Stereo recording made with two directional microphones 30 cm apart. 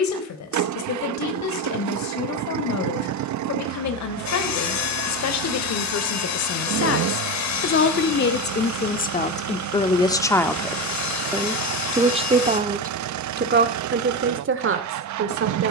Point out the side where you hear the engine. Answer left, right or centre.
right.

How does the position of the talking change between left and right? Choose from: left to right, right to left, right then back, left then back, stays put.
left to right.